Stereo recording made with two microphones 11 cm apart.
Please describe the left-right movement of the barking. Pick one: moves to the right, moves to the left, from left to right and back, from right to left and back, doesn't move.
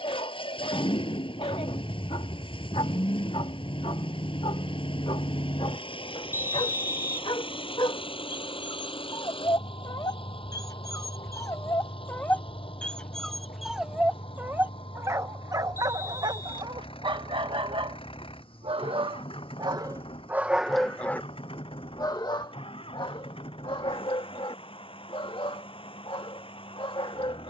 from left to right and back.